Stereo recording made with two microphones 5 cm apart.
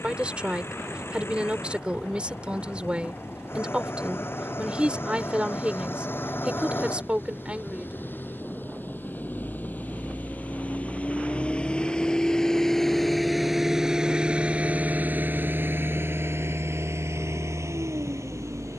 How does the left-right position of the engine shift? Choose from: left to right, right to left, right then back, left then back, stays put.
left to right.